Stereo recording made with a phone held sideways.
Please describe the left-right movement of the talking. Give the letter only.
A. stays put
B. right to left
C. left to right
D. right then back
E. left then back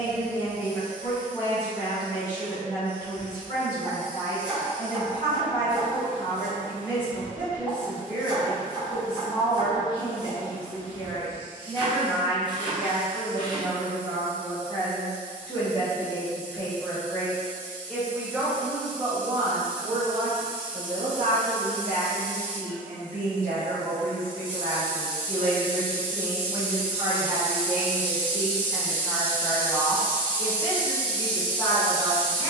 D.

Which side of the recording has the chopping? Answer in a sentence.
You can hear the chopping on the right.